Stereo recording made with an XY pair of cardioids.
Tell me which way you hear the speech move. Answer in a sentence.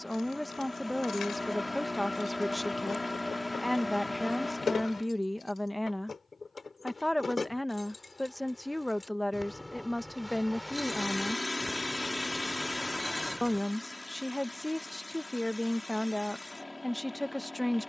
In this clip you hear the speech stay in one place.